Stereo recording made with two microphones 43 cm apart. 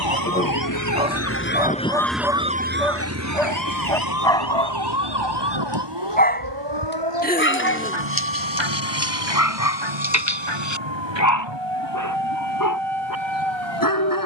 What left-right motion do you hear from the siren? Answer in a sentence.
In this clip you hear the siren move to the right.